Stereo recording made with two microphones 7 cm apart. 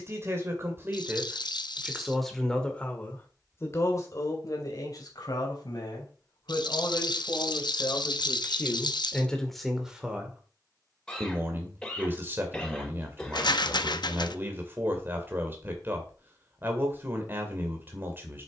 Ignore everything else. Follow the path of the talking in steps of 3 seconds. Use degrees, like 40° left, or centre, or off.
10° right, 50° left, 40° left, 10° right, 30° right, 30° right.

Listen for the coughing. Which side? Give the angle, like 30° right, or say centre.
10° left.